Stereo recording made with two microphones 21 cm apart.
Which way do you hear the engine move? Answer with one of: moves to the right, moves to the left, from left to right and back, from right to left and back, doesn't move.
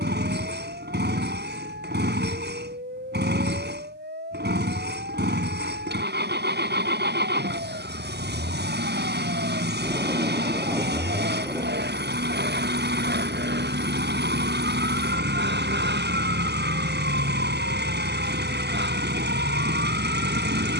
doesn't move.